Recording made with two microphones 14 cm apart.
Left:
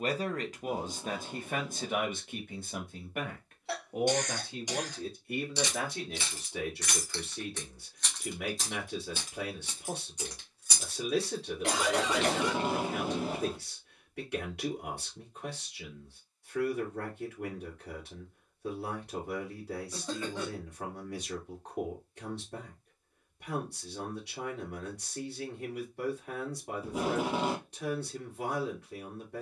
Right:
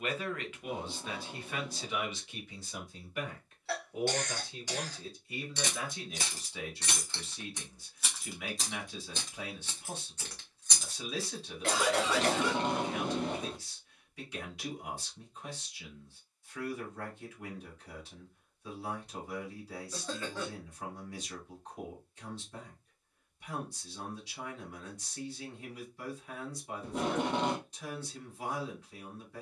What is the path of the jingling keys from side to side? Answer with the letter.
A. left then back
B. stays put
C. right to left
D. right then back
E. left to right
A.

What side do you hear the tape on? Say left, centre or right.
centre.